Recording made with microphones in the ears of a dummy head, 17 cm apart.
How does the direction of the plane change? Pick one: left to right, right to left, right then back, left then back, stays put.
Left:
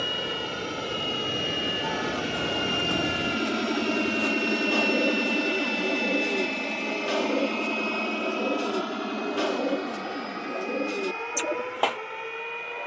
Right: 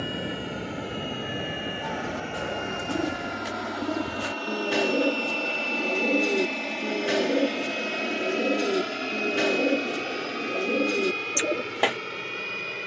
left to right.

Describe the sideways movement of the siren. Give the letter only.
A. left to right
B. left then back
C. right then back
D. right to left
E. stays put
D.